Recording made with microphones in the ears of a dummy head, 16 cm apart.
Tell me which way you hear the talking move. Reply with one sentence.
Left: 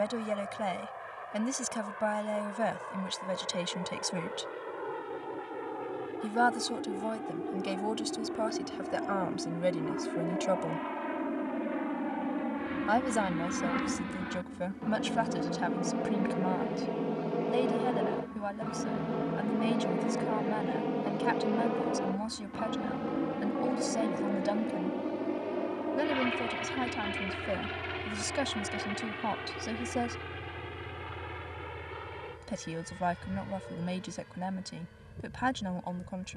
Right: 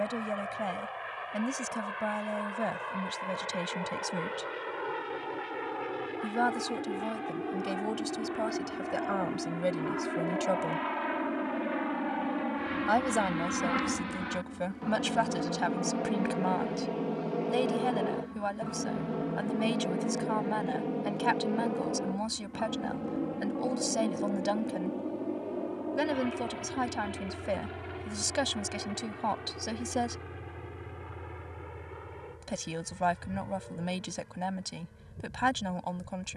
You can hear the talking go from the left side to the right.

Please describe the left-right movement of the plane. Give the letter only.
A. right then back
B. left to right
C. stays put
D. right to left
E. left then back
D.